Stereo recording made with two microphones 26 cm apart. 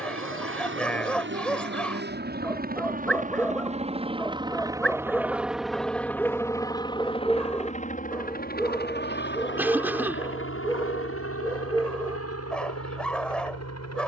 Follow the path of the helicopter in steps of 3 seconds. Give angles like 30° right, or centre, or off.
40° right, 10° right, 20° left, 50° left, 60° left.